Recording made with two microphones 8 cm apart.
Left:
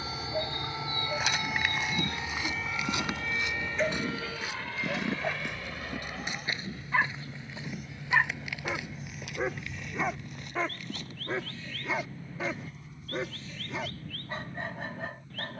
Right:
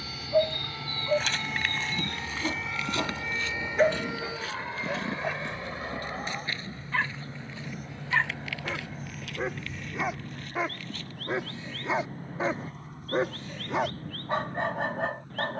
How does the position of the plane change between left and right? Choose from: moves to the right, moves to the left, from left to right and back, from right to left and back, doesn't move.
moves to the right.